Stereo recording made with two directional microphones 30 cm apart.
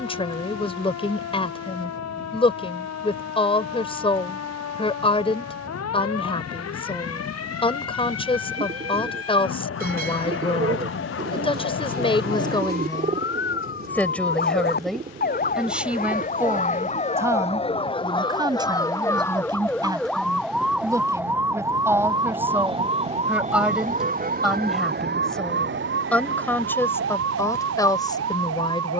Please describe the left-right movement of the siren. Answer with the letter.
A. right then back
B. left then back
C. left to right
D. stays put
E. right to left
C.